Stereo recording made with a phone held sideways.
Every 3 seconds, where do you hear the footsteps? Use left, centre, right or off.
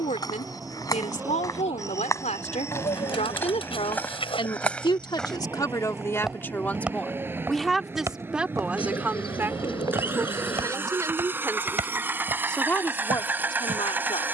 left, centre, centre, right, right.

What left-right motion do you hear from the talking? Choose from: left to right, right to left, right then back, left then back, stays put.
right then back.